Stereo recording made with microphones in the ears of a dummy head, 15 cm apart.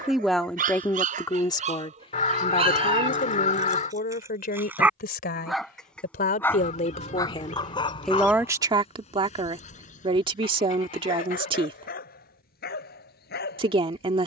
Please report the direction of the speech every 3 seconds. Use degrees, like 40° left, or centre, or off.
20° left, 50° left, 20° left, 30° right, 30° right.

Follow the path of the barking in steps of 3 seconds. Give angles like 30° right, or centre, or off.
40° right, 10° right, 30° left, 50° left, 60° left.